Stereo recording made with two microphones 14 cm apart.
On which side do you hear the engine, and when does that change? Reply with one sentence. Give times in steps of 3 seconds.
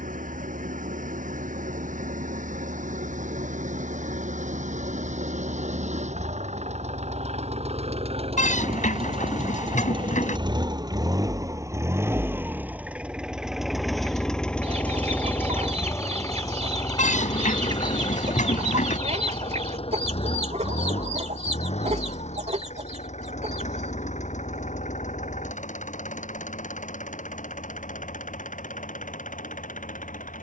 You can hear the engine on the right from 0 s, in the centre from 12 s and on the left from 15 s.